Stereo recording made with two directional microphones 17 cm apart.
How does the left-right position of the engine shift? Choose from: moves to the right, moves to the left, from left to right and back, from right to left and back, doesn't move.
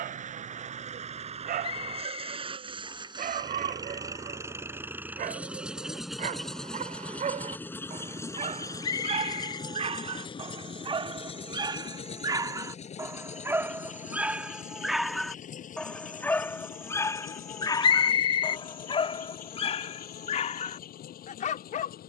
moves to the left.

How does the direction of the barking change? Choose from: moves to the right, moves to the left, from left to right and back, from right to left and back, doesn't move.
moves to the left.